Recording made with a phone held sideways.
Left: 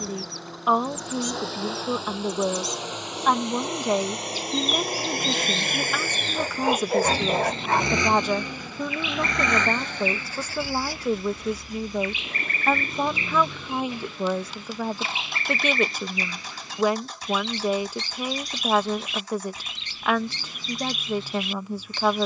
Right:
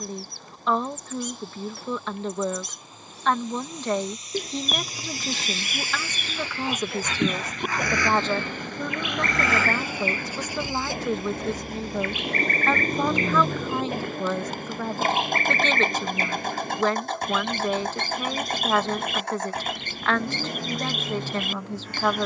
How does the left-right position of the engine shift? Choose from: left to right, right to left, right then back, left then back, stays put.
left to right.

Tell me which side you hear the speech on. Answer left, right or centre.
centre.